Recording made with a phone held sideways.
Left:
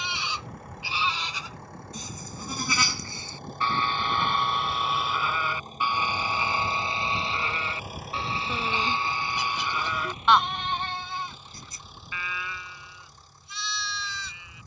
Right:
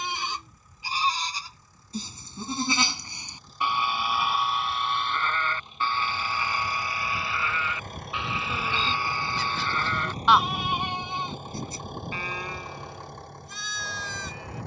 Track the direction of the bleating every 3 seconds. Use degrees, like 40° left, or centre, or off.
30° right, centre, 30° left, centre, 40° right.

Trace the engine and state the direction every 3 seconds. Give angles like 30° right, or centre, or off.
70° left, 50° left, 10° left, 40° right, 60° right.